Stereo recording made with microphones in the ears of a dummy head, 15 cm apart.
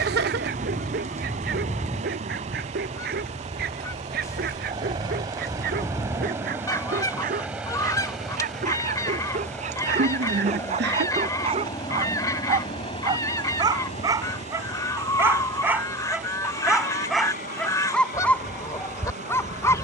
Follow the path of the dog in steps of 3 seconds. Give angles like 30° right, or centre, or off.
60° right, 60° right, 50° right, 40° right, 20° right, centre, 10° left.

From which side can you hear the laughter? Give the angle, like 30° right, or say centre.
70° right.